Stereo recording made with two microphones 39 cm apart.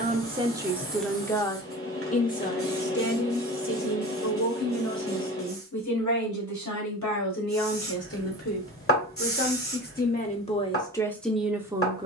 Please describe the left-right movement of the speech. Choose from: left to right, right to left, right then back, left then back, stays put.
left then back.